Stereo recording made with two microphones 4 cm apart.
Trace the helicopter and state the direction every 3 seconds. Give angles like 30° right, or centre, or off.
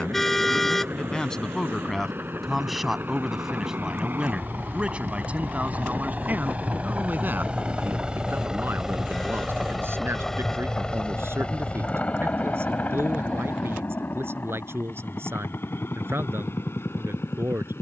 60° right, 50° right, 30° right, 10° left, 50° left, 60° left.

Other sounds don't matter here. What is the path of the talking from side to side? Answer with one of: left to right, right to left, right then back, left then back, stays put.
left to right.